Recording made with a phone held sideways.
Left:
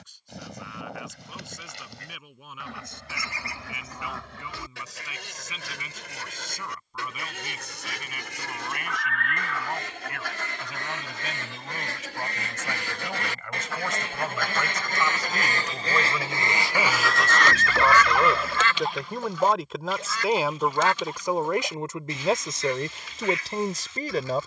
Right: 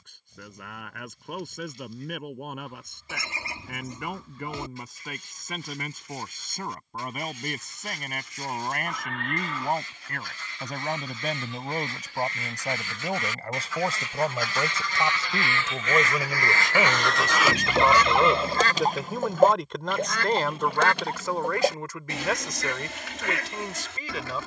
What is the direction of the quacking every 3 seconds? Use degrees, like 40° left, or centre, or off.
80° left, 80° left, 80° left, 70° left, 60° left, 20° left, 50° right, 70° right.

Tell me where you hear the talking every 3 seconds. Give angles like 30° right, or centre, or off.
60° right, 50° right, 50° right, 40° right, 40° right, 20° right, centre, 30° left.